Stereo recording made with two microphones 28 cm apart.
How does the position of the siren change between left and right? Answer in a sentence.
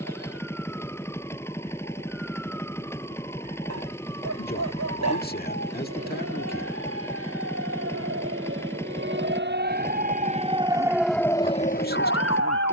You can hear the siren move from right to left.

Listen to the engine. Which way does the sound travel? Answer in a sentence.
In this clip you hear the engine stay put.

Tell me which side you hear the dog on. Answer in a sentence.
You can hear the dog on the right.